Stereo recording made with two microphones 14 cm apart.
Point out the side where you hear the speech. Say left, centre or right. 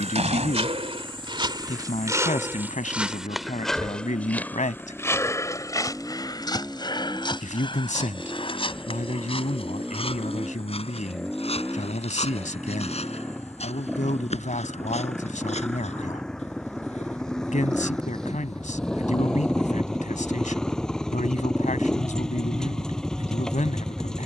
left.